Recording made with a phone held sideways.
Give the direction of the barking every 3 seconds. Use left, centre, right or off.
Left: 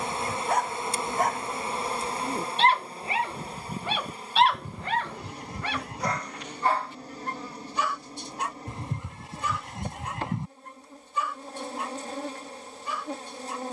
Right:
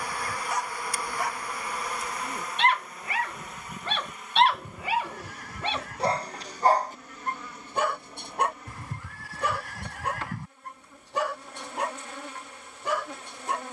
left, centre, right, right, right.